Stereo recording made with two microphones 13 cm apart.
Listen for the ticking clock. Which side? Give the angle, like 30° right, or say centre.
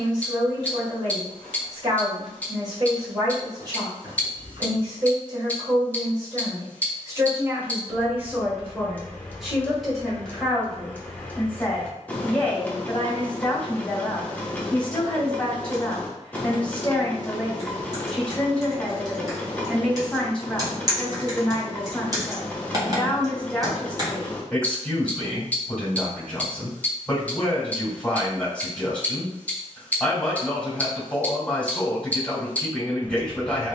10° left.